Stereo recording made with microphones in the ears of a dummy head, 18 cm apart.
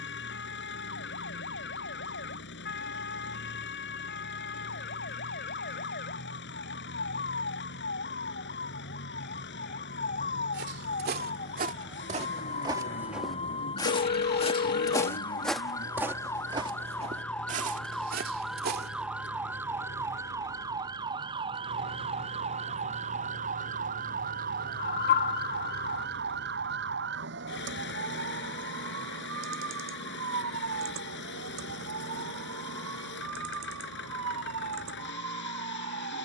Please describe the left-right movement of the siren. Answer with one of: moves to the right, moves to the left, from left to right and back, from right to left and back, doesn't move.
moves to the right.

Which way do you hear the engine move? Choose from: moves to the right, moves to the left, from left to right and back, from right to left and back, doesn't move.
doesn't move.